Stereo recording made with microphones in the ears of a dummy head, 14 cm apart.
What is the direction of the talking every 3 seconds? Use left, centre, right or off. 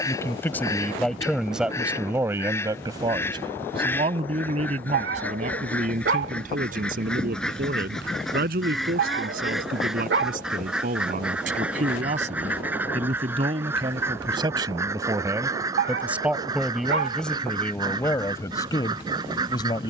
centre, right, right, right, right, centre, left.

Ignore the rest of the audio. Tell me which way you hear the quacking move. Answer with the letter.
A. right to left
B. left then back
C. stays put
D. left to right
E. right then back
D.